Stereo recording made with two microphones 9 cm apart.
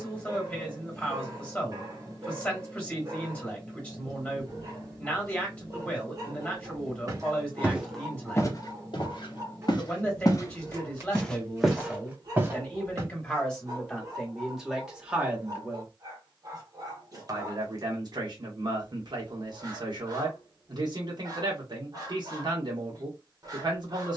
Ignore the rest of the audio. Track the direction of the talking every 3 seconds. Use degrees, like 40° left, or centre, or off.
10° left, 10° left, 10° left, 10° left, 10° left, 30° right, 50° right, 50° right.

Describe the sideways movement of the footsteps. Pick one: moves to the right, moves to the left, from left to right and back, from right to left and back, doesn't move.
from right to left and back.